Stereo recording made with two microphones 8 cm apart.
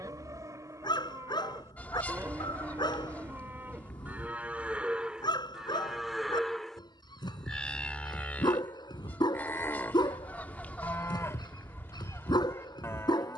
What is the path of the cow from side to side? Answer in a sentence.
You can hear the cow move to the left.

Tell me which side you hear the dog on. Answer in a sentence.
In this clip you hear the dog on the left.